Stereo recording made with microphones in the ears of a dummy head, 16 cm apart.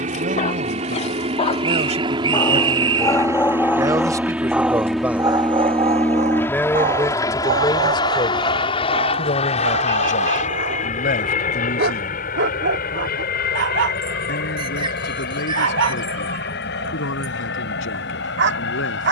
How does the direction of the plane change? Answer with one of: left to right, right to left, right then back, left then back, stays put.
right to left.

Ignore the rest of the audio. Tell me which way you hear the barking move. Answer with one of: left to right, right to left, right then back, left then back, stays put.
left to right.